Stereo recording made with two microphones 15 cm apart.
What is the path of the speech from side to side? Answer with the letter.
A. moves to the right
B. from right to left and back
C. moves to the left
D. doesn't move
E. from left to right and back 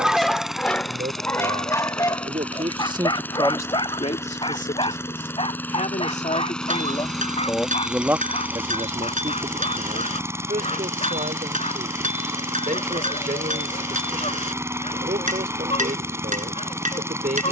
B.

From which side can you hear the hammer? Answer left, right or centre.
right.